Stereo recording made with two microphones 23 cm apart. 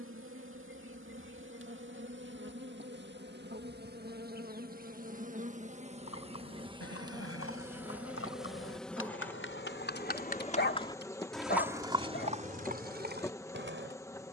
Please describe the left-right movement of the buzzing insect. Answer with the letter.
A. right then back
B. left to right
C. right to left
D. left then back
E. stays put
C.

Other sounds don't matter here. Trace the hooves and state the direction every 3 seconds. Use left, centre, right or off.
off, off, left, left, right.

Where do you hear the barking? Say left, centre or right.
left.